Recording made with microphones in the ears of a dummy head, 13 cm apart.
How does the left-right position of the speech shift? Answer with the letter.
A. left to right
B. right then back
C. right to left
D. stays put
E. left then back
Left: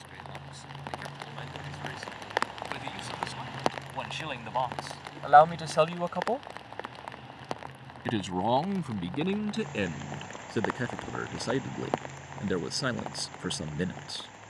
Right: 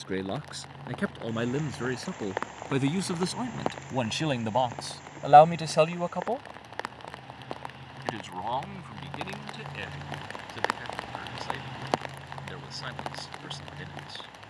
C.